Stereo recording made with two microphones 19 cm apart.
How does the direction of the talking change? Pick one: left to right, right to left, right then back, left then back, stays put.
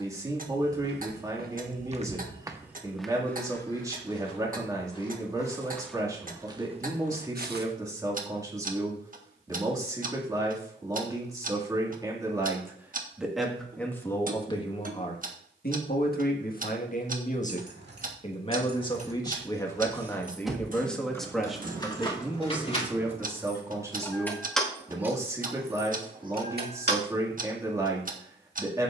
left then back.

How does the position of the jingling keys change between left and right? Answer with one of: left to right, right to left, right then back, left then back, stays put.
left then back.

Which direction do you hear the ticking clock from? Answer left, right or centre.
right.